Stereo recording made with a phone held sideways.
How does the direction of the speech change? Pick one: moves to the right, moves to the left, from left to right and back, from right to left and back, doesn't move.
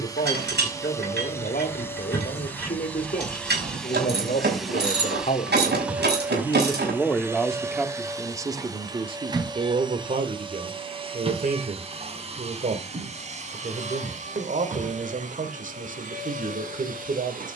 moves to the right.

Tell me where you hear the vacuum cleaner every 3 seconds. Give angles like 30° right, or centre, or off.
10° left, centre, 20° right, 30° right, 40° right, 50° right.